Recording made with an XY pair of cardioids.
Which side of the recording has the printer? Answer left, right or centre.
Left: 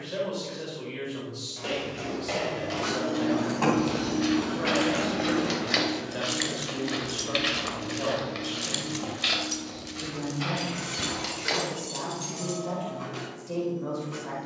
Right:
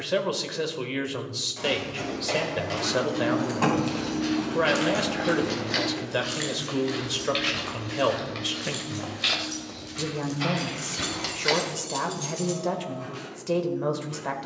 left.